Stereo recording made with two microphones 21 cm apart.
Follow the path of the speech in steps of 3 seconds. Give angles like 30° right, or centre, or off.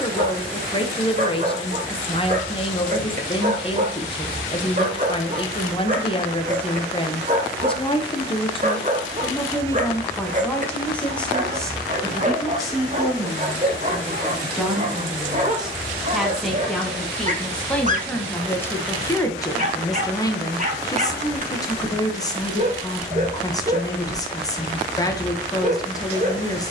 30° left, 30° left, 30° left, 10° left, centre, centre, 10° left, 20° left, 20° left.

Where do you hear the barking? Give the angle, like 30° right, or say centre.
40° right.